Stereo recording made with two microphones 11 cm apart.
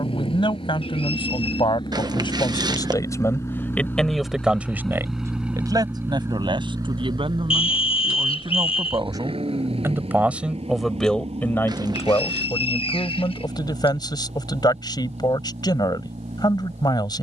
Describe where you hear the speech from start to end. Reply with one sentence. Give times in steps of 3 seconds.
In this clip you hear the speech on the left from 0 s, in the centre from 3 s, on the right from 6 s, in the centre from 9 s and on the left from 12 s.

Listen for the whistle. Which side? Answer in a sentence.
In this clip you hear the whistle on the left.